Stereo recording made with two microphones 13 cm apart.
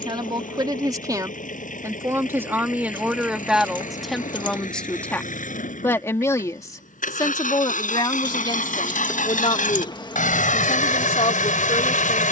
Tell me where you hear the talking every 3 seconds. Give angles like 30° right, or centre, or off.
20° right, centre, 30° left, 50° left.